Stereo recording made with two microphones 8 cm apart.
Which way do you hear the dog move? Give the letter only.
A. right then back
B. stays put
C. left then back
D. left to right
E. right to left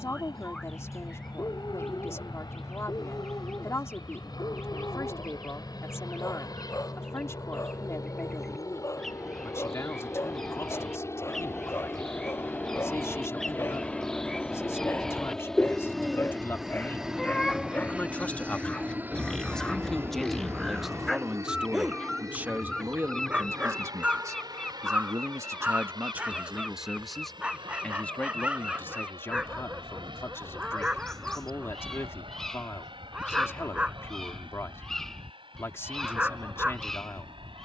D.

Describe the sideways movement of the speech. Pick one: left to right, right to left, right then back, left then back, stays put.
right then back.